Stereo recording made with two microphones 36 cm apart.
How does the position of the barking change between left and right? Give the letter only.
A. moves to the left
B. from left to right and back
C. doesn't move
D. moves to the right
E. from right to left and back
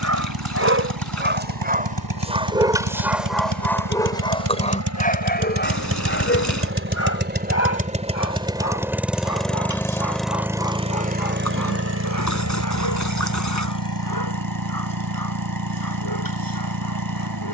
A.